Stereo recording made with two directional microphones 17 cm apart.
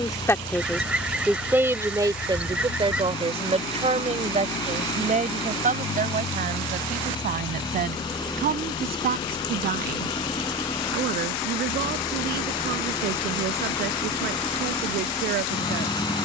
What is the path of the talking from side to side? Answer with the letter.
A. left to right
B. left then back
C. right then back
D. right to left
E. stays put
A.